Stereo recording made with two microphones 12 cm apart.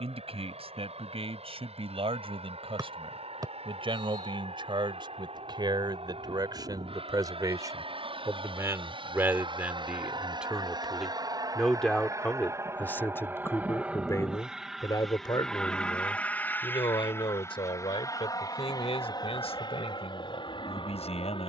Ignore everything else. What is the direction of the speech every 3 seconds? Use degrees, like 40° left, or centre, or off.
60° right, 50° right, 30° right, 10° right, 20° left, 40° left, 60° left.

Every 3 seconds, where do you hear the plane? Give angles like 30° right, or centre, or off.
70° right, 70° right, 60° right, 40° right, 10° right, 10° left, 40° left.